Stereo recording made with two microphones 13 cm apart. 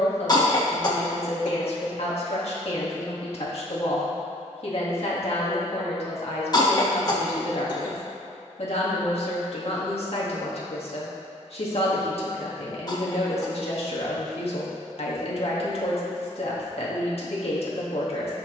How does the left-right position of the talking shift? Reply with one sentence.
You can hear the talking stay in one place.